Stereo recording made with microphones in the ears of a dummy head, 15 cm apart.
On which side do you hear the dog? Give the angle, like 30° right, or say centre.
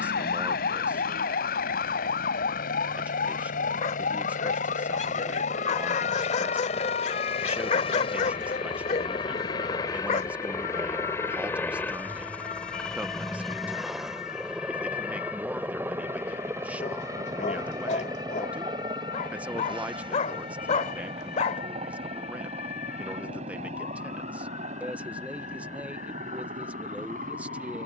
40° left.